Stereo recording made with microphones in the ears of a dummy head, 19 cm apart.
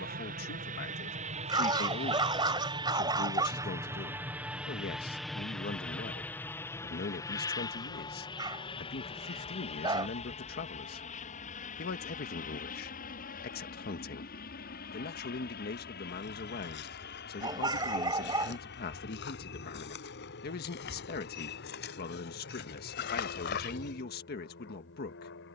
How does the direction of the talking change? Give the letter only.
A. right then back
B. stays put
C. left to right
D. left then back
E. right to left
B.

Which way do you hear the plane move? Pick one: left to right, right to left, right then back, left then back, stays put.
right to left.